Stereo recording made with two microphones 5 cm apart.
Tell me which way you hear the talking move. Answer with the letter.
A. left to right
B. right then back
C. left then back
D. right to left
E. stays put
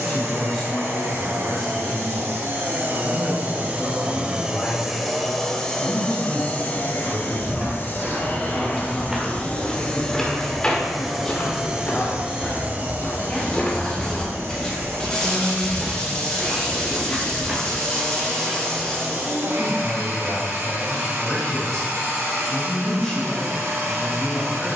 E.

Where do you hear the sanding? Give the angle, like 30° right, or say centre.
20° left.